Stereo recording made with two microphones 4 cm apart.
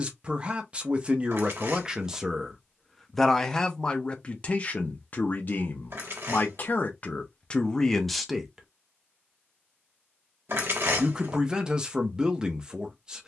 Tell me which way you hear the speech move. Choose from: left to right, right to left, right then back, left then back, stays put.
left then back.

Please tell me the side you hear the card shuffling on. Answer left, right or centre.
right.